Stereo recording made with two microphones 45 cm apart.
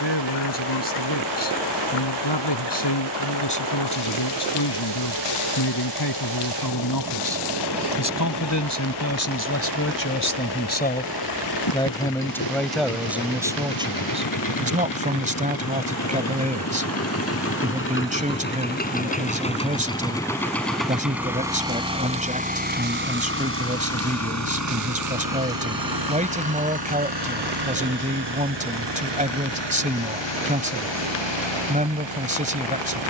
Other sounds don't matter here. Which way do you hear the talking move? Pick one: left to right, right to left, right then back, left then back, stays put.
left to right.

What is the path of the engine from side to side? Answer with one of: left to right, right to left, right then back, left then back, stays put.
left to right.